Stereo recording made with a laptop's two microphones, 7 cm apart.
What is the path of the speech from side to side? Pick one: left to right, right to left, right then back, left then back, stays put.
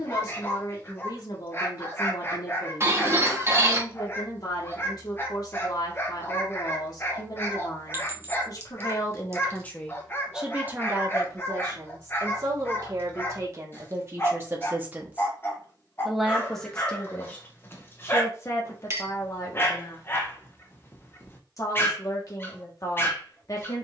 right then back.